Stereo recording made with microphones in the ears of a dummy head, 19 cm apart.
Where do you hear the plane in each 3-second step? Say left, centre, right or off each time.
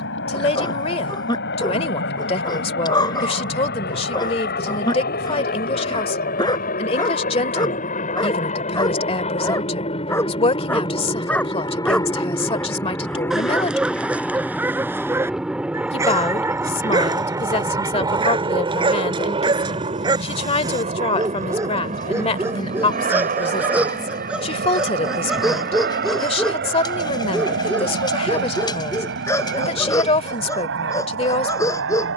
left, left, left, left, centre, centre, right, right, right, right, right.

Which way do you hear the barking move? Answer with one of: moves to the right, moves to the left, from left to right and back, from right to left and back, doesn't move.
from left to right and back.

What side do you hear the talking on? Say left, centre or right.
left.